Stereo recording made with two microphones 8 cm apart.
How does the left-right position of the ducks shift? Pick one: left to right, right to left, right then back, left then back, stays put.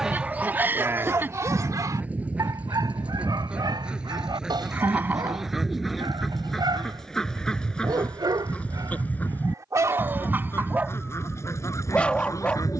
right to left.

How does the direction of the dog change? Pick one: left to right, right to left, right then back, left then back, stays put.
right then back.